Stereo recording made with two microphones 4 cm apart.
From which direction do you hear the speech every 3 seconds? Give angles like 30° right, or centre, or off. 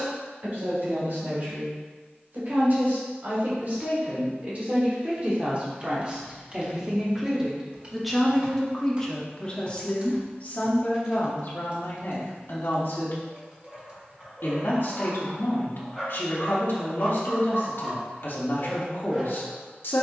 50° right, 40° right, 10° right, 40° left, 60° left, 60° left, 60° left.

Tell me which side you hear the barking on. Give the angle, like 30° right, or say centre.
10° right.